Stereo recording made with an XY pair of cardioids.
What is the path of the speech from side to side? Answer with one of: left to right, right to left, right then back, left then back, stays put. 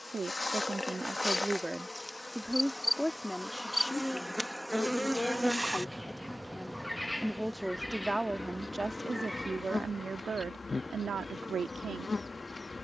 left then back.